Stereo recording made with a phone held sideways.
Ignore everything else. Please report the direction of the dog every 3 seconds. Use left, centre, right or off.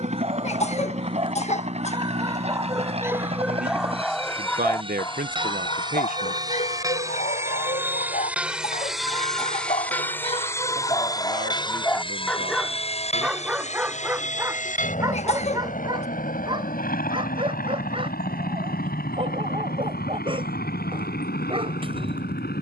right, centre, left, left, centre, right, right, right.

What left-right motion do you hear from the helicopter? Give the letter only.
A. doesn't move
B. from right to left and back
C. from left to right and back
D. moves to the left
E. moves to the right
D.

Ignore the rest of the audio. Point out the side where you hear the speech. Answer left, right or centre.
right.